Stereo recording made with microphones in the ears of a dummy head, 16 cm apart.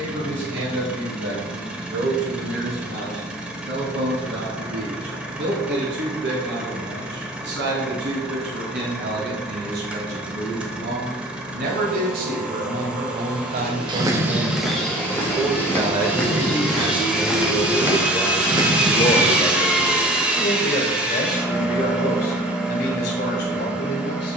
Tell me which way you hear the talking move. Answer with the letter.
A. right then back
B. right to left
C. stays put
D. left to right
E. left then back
B.